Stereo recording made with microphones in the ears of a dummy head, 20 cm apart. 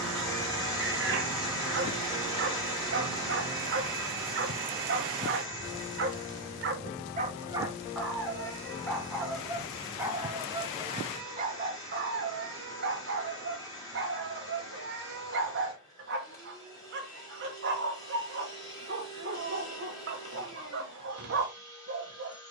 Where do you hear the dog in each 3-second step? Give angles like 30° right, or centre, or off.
50° right, 50° right, 10° right, 20° right, 50° right, 50° right, 50° right, 50° right.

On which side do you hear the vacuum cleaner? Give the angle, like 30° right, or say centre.
20° left.